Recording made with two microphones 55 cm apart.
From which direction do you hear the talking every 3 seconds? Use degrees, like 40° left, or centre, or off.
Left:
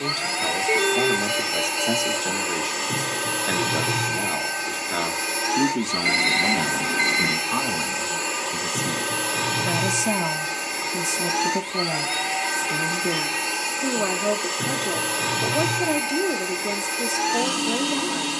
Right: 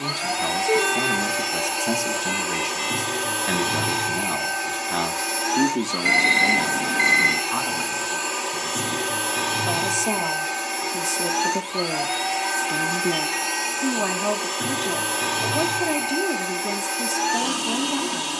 20° right, 20° right, 50° left, 30° left, 10° right, 20° right.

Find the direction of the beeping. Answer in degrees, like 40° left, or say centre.
centre.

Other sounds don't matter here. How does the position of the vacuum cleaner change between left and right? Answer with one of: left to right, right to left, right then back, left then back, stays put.
stays put.